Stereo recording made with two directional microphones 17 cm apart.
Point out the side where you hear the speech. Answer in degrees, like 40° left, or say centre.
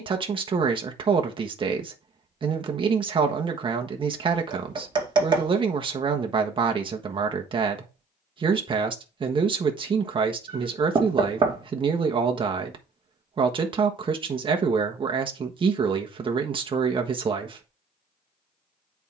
30° right.